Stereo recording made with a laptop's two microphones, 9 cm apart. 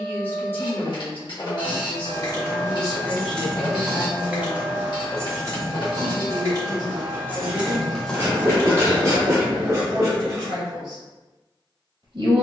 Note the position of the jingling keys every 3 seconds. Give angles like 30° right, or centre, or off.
40° left, 20° right, 10° right, off.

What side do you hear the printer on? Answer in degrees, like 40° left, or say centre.
60° left.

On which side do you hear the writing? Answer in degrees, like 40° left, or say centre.
30° right.